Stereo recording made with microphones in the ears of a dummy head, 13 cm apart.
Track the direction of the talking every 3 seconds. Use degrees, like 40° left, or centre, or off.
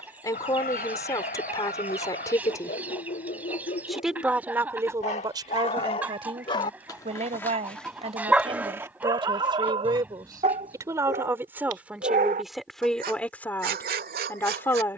20° left, 20° right, 40° right, 30° right, 10° left.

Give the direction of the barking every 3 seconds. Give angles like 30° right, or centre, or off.
70° left, 50° left, 10° left, 40° right, 70° right.